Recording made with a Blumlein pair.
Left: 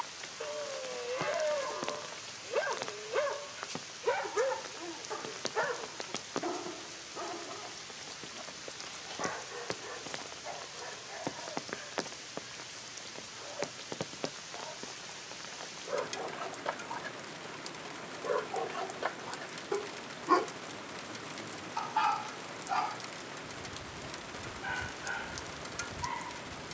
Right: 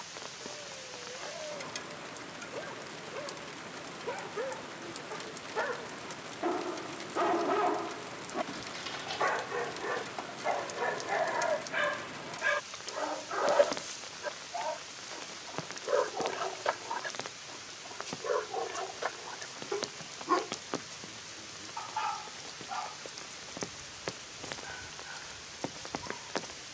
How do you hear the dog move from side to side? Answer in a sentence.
You can hear the dog go right and come back.